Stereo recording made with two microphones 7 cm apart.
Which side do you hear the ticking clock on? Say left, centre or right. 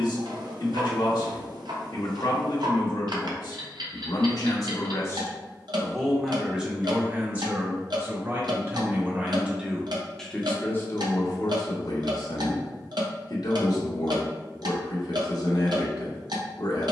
right.